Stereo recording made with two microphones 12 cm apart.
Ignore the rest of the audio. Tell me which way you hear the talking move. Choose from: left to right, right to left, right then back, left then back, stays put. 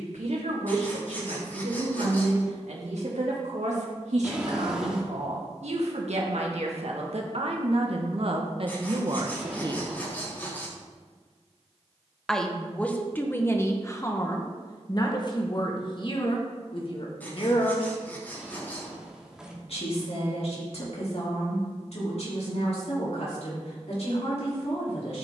right to left.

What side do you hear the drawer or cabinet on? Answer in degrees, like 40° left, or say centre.
10° right.